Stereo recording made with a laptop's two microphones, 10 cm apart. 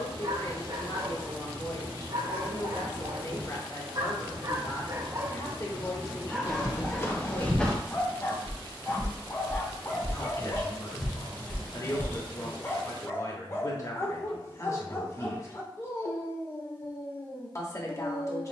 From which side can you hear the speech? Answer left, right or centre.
left.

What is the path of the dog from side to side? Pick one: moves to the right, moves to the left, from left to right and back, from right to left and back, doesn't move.
moves to the left.